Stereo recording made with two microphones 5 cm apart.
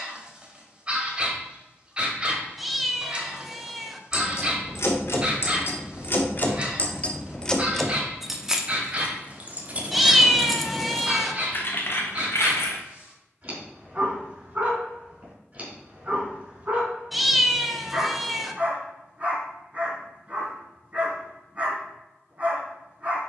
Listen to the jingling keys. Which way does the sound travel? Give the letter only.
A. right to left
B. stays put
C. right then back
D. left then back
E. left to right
C.